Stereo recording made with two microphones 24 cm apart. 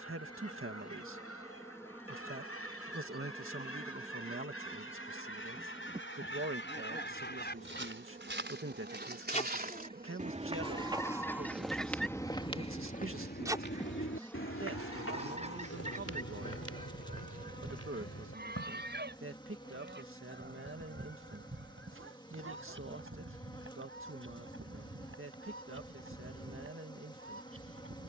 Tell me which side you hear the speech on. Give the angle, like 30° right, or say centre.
60° right.